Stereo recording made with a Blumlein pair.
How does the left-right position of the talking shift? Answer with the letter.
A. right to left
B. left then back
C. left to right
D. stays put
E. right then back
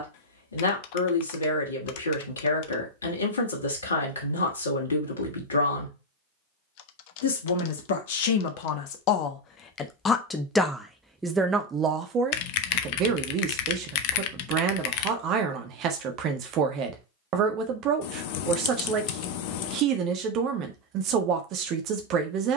C.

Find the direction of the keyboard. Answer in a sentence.
You can hear the keyboard on the left.